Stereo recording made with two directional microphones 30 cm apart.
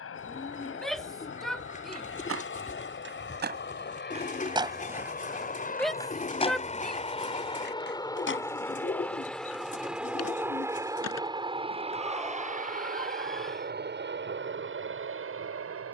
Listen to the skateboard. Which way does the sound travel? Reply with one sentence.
You can hear the skateboard move to the left.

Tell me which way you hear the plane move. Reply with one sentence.
In this clip you hear the plane travel towards the right.